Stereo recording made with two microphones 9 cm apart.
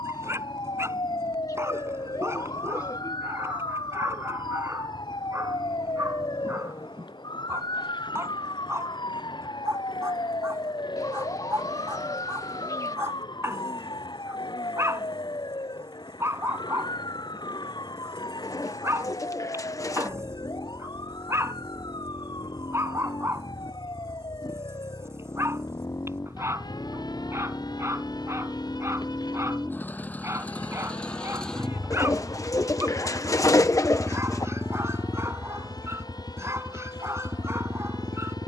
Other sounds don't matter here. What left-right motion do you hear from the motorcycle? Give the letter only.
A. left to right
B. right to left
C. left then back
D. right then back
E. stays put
A.